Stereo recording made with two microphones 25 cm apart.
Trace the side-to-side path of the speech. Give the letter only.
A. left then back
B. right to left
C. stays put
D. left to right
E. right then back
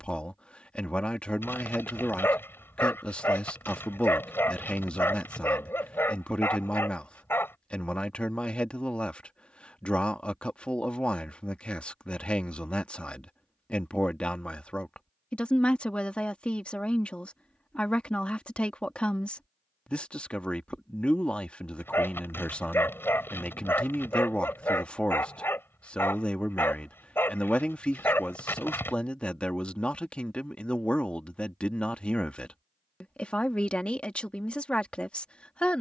C.